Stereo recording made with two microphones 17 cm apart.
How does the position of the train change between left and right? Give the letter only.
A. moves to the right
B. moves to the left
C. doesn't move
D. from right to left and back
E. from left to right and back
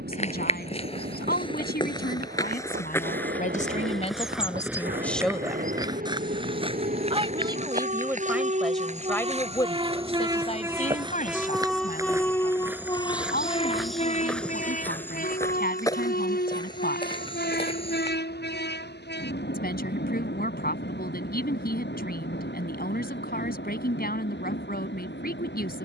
B.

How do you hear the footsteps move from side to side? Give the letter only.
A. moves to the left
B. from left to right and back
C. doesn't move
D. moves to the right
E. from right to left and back
B.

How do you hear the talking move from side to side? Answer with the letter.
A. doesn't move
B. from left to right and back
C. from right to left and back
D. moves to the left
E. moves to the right
B.